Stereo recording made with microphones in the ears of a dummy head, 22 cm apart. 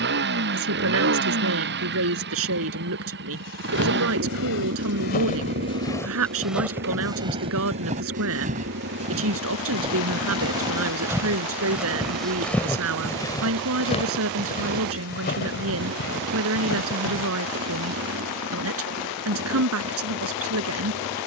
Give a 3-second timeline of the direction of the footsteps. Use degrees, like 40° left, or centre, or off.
off, 50° left, 20° right, 20° right, 20° left, 50° left, off.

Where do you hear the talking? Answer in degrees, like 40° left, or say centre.
60° right.